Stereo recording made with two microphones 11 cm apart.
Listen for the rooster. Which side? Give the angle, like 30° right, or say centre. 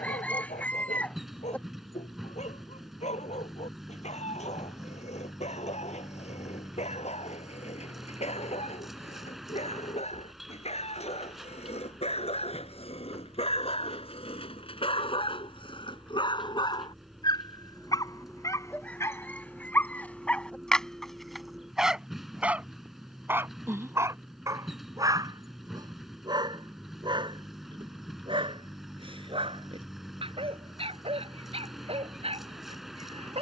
10° left.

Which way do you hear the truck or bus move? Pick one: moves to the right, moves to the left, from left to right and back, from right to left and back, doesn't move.
doesn't move.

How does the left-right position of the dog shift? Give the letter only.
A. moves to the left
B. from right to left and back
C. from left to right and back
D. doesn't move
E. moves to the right
E.